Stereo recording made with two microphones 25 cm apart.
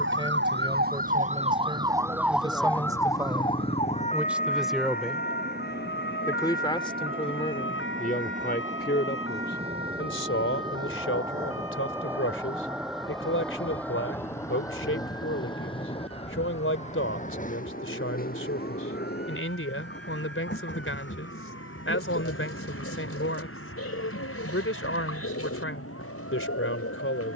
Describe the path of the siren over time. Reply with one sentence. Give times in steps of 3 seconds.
In this clip you hear the siren on the right from 0 s and on the left from 3 s.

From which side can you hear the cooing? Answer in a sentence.
In this clip you hear the cooing on the left.